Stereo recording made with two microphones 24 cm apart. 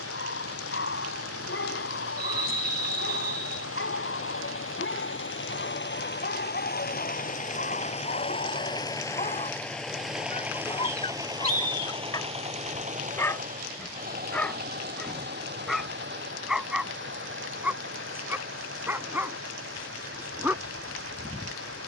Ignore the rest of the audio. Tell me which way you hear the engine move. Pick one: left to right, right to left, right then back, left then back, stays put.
left to right.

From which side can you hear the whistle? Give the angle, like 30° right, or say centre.
40° right.